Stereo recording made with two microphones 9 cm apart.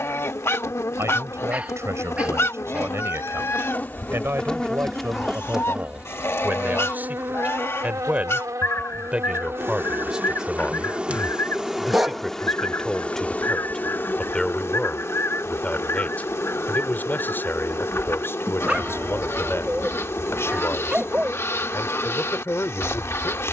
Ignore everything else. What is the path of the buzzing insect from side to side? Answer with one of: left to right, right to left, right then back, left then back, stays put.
right then back.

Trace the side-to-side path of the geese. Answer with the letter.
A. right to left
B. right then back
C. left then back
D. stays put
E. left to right
D.